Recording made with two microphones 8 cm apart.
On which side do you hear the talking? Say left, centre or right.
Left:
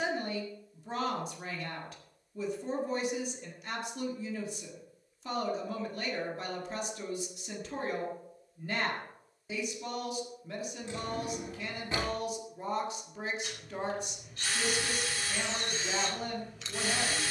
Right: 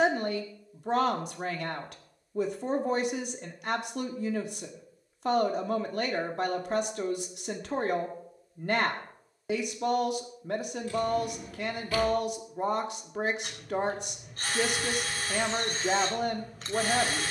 right.